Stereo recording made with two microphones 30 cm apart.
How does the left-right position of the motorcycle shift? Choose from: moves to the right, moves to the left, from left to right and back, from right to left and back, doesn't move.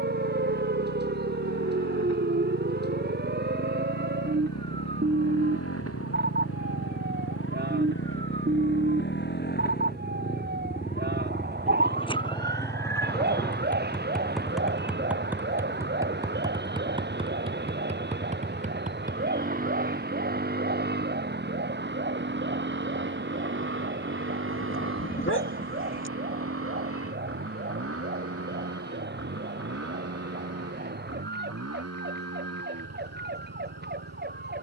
moves to the right.